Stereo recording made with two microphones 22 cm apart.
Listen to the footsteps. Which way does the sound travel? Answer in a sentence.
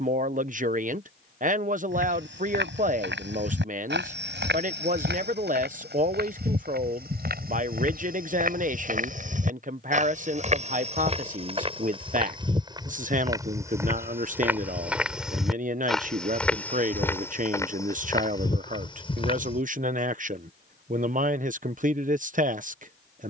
You can hear the footsteps travel towards the left.